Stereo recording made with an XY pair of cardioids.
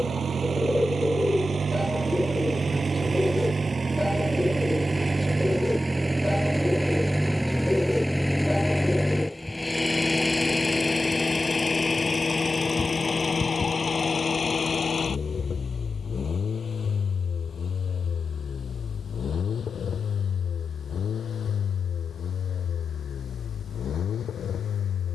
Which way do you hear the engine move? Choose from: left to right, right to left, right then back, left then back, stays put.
right to left.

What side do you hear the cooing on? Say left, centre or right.
centre.